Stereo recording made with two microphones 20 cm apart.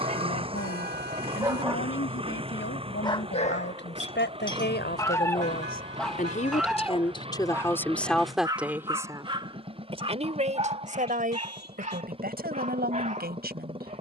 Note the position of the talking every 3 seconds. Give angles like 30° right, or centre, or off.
80° left, 60° left, 10° left, 30° right, 50° right.